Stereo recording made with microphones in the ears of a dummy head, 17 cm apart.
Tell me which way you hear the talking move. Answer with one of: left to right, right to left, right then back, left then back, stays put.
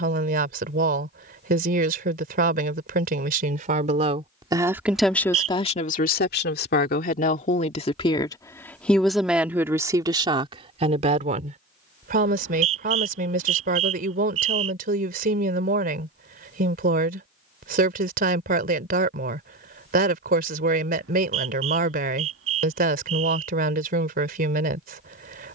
left then back.